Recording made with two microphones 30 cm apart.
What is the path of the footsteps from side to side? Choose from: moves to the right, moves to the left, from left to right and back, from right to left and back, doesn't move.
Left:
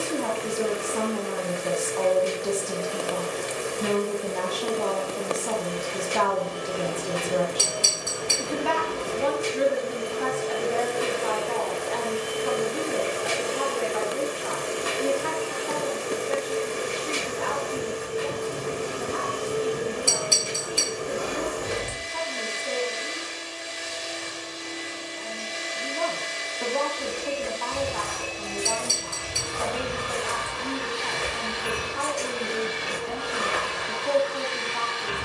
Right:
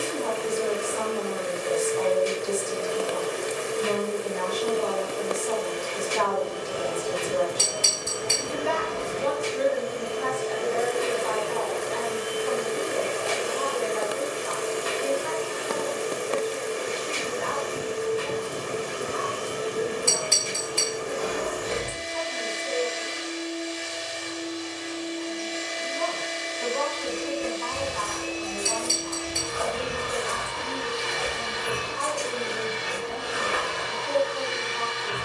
from right to left and back.